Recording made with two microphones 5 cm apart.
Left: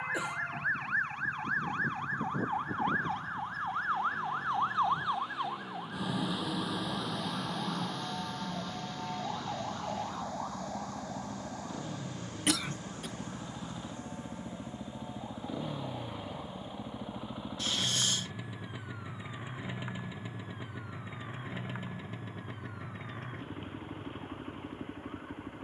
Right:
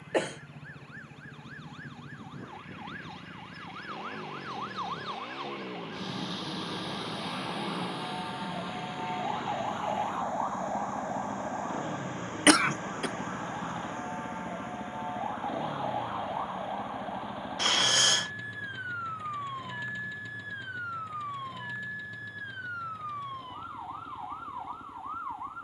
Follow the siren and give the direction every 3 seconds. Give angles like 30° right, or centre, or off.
50° left, 30° left, centre, 30° right, 40° right, 50° right, 50° right, 60° right, 60° right.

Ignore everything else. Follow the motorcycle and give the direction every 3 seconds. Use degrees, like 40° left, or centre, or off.
60° right, 50° right, 50° right, 40° right, 20° right, centre, 20° left, 40° left, 50° left.